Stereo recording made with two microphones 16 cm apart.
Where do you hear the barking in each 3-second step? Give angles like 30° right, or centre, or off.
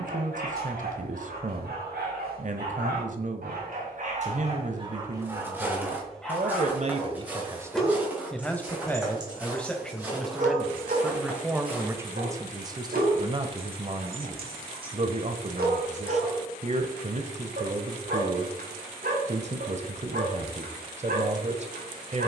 70° right, 40° right, centre, 50° right, 70° right, 70° right, 70° right, 70° right.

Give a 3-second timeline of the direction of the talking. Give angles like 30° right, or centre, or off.
50° right, 50° right, 20° right, centre, 30° right, 50° right, 50° right, 50° right.